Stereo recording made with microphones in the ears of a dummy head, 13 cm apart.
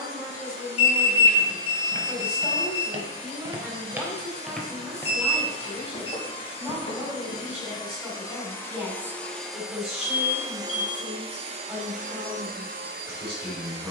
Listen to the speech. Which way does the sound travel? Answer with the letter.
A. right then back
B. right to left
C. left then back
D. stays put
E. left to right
D.